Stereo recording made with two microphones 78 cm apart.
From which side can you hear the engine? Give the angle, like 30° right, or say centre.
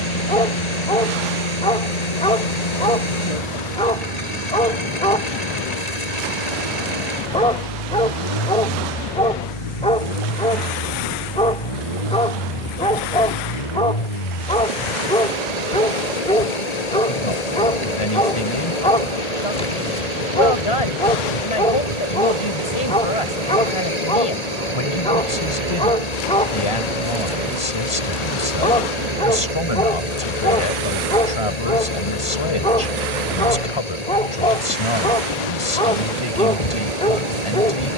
50° left.